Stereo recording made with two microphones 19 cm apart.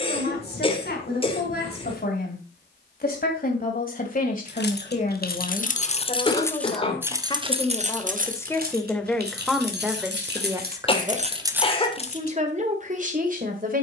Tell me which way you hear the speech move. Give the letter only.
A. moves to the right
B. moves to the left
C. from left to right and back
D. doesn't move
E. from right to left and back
A.